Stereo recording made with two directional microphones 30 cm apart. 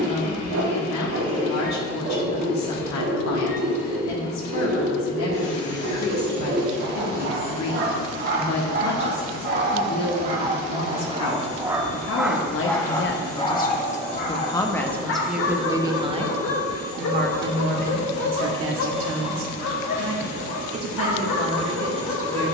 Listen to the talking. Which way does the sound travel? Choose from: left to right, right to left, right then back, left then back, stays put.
left to right.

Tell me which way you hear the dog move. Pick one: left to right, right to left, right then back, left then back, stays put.
right to left.